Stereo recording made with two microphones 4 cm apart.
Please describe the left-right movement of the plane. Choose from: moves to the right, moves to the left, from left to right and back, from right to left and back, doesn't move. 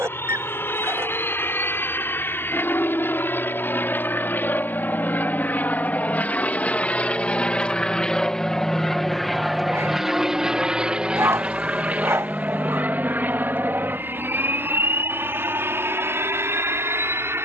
moves to the right.